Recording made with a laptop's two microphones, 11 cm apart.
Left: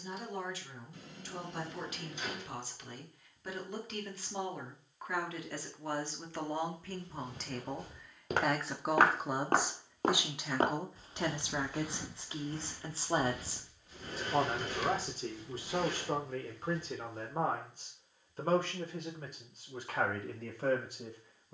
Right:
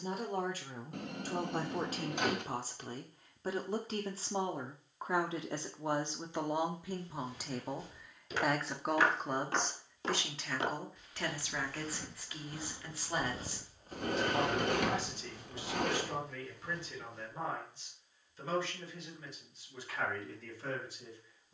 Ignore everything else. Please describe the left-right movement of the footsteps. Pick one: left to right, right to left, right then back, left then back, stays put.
left to right.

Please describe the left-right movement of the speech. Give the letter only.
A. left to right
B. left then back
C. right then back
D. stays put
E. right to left
E.